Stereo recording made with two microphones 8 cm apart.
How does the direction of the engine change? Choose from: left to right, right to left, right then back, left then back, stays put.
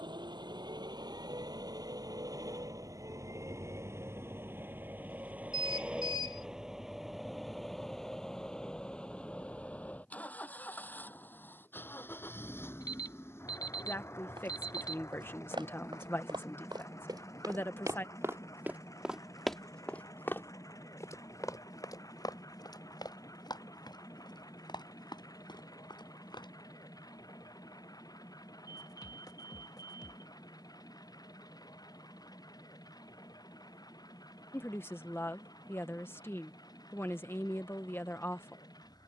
right to left.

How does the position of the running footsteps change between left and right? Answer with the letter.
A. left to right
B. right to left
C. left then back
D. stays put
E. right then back
B.